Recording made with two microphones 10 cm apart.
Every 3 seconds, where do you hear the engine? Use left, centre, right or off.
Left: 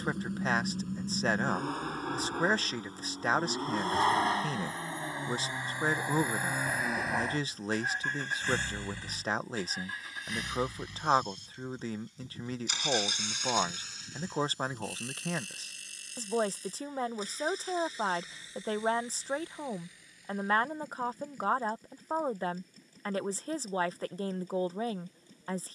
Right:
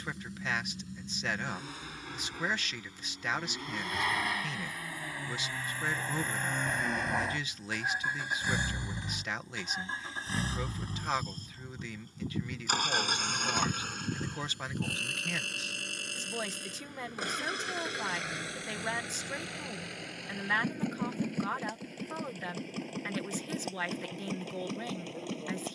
left, left, centre, right, right, right, right, right, right.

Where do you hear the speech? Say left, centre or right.
left.